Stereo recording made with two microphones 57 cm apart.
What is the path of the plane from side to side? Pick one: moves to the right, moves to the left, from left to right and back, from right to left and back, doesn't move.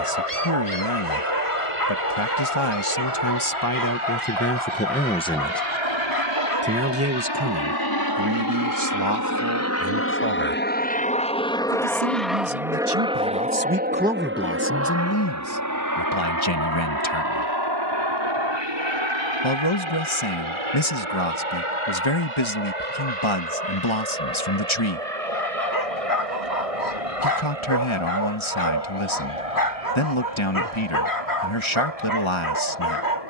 moves to the right.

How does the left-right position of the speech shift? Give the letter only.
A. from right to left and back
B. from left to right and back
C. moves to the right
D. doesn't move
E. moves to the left
B.